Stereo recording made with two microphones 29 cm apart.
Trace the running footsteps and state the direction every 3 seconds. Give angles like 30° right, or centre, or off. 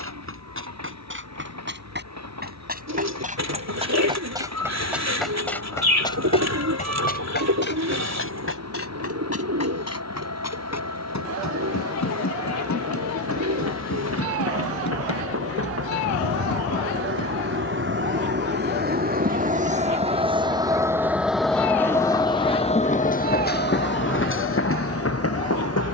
40° right, 10° right, 40° left, 60° left, 80° left, 80° left, off, off, off.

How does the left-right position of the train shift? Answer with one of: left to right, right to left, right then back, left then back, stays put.
right to left.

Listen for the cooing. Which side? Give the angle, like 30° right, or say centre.
70° right.